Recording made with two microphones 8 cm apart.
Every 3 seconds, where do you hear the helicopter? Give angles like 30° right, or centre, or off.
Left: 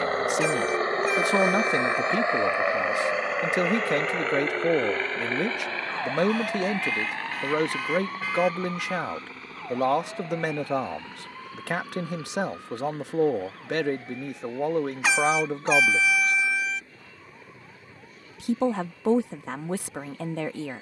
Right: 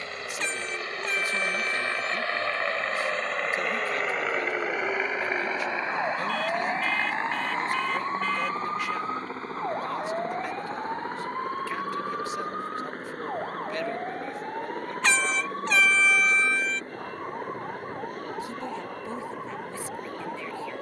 30° left, 10° right, 30° right, 40° right, 40° right, 50° right, 50° right.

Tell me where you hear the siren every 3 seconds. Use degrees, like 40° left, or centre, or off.
30° left, centre, 20° right, 40° right, 50° right, 50° right, 60° right.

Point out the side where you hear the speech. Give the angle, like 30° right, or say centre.
70° left.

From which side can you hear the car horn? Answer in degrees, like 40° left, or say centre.
10° left.